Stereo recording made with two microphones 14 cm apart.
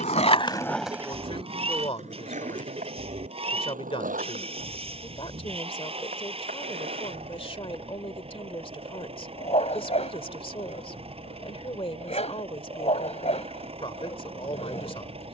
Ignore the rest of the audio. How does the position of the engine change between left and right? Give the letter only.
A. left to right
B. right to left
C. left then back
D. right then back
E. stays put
E.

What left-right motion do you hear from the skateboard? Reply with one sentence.
In this clip you hear the skateboard move from left to right.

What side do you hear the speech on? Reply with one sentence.
You can hear the speech on the left.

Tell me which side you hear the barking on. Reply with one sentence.
You can hear the barking on the left.